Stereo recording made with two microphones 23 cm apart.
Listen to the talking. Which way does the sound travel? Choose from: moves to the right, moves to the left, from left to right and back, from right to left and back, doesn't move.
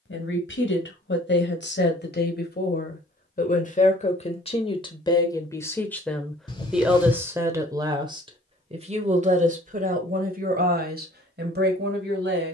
moves to the right.